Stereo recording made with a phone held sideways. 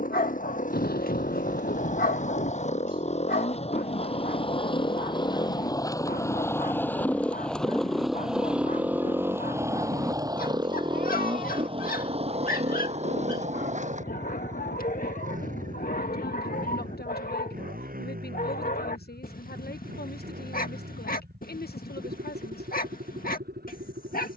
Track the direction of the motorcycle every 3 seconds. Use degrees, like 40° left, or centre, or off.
50° left, 30° left, 10° left, 20° right, 40° right, 60° right, 60° right, 70° right.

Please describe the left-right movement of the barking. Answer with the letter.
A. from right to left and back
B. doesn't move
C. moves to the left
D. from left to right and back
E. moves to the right
B.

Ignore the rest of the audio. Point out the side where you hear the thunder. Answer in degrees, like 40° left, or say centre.
70° left.